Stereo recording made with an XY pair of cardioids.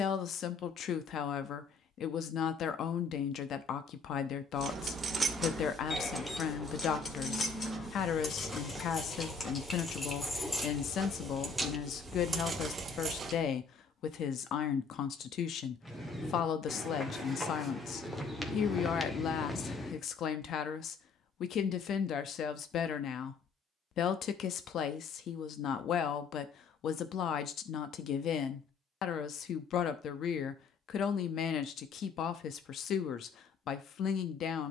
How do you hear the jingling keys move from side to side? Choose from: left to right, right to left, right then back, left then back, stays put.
left then back.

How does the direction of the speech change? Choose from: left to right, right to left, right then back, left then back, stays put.
stays put.